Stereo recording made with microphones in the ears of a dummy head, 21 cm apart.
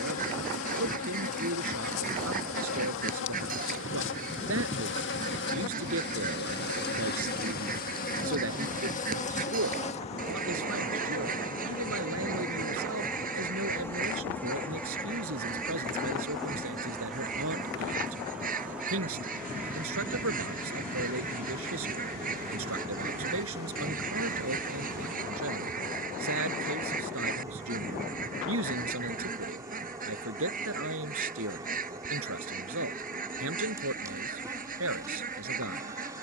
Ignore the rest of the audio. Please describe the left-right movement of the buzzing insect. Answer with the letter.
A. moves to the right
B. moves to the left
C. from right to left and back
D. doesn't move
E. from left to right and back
A.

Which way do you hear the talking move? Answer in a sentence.
In this clip you hear the talking stay in one place.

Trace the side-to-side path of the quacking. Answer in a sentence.
You can hear the quacking stay in one place.